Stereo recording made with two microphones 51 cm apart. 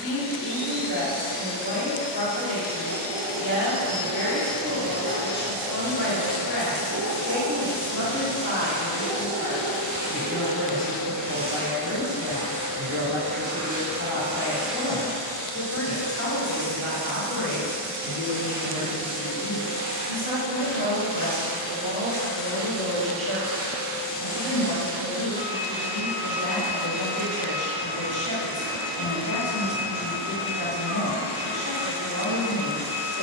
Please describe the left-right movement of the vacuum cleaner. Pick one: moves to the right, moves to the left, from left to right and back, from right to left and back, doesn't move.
from left to right and back.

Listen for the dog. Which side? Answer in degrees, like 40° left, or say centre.
40° right.